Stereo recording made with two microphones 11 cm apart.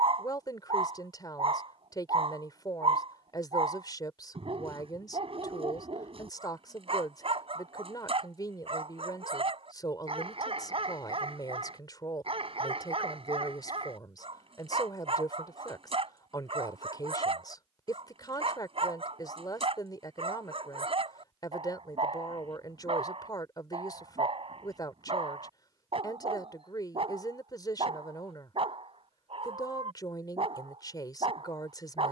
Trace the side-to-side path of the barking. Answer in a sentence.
You can hear the barking stay put.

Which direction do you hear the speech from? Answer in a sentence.
In this clip you hear the speech on the left.